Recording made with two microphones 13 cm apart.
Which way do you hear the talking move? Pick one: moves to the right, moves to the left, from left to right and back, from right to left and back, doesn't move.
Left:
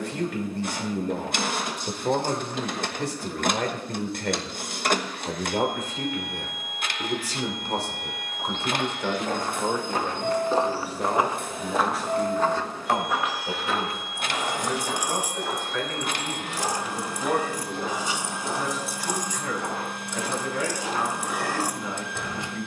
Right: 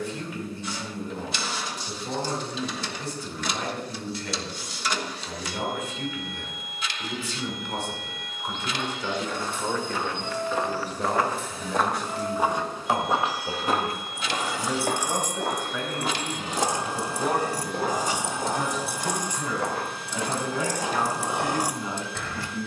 moves to the right.